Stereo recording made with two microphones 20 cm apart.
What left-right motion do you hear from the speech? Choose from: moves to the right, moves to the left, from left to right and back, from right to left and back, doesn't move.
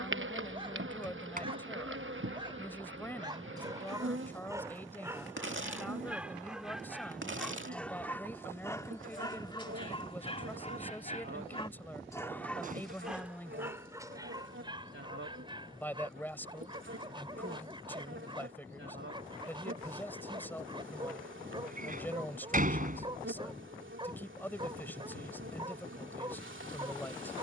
doesn't move.